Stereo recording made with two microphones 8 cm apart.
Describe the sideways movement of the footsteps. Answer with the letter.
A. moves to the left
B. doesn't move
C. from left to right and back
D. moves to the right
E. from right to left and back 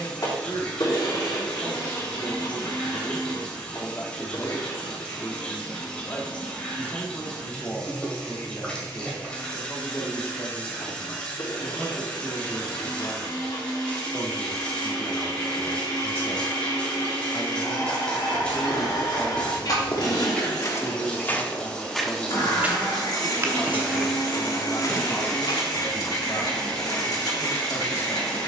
C.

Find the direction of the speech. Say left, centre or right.
left.